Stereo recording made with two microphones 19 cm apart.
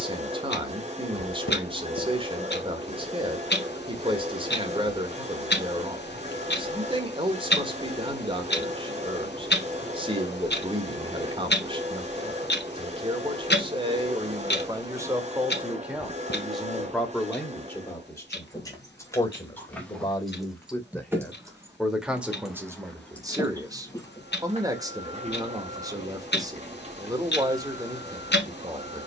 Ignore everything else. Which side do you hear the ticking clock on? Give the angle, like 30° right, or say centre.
60° left.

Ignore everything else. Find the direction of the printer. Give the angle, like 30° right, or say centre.
40° right.